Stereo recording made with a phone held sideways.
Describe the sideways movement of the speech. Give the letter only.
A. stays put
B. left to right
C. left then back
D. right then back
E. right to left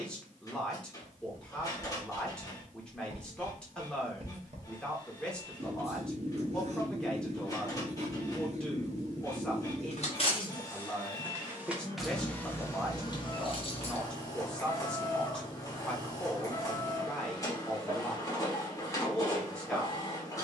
A.